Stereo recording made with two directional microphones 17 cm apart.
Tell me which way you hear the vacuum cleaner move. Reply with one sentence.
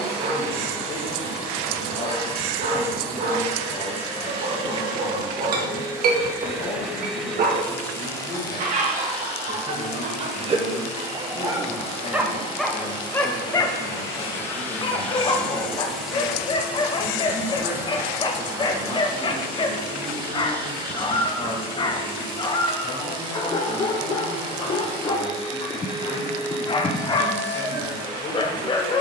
You can hear the vacuum cleaner go left and come back.